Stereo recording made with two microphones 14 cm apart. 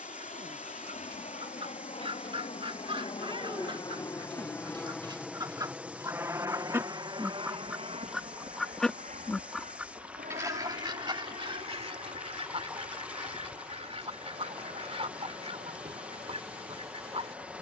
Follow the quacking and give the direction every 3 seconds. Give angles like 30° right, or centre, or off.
40° right, 30° right, 10° right, 30° right, 50° right, 50° right.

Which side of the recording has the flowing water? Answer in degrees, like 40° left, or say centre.
10° right.